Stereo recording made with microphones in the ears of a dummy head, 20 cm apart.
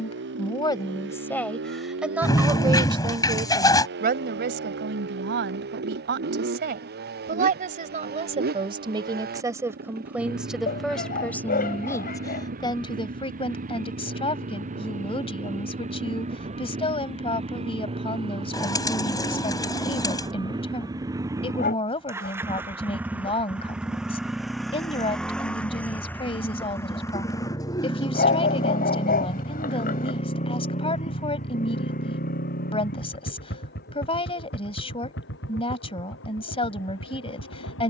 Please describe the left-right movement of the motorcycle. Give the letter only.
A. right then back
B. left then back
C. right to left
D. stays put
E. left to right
C.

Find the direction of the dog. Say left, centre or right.
left.